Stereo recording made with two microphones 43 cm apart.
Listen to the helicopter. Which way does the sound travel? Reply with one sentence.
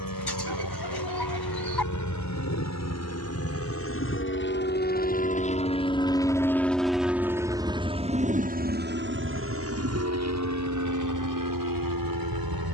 You can hear the helicopter travel towards the right.